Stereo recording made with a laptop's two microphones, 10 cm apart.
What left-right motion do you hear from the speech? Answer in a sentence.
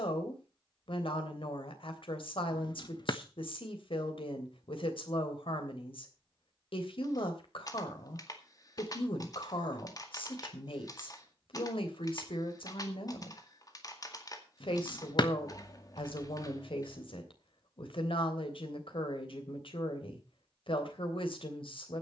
You can hear the speech stay put.